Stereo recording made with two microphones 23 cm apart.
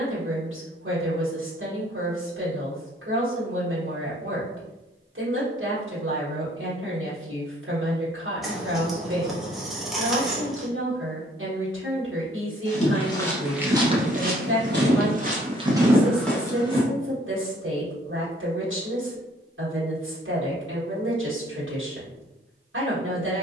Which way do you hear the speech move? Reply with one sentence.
You can hear the speech stay put.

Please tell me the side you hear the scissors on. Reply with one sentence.
In this clip you hear the scissors in the centre.